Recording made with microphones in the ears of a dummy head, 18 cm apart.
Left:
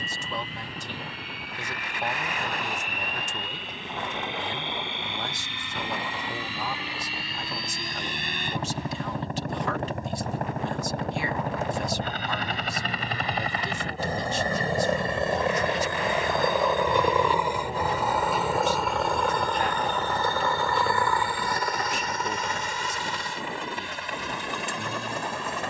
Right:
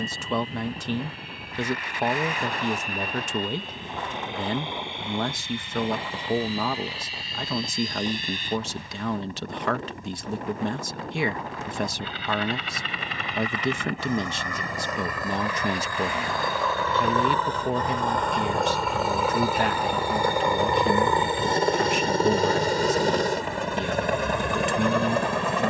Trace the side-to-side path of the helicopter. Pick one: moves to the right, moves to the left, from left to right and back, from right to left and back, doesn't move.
moves to the right.